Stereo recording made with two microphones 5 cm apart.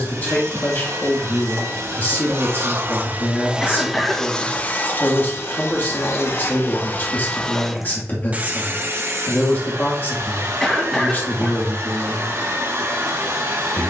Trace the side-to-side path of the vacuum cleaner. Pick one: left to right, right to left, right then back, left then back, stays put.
left then back.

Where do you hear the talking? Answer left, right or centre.
left.